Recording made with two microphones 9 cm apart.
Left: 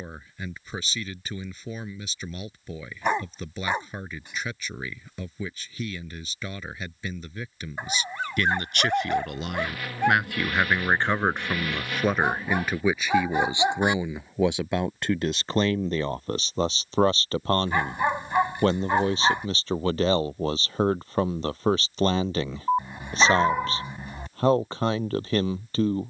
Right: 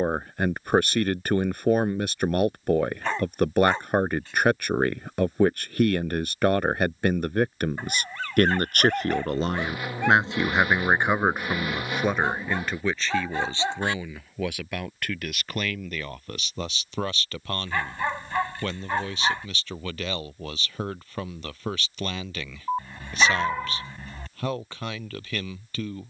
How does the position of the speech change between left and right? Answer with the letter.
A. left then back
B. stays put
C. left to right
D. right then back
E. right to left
E.